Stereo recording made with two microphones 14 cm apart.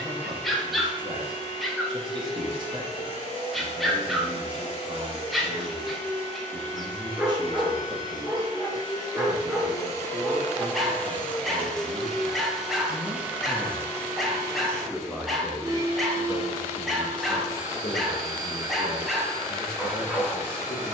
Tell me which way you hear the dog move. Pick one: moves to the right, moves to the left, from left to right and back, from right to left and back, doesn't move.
doesn't move.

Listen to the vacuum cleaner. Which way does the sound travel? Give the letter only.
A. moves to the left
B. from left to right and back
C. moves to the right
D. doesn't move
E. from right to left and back
C.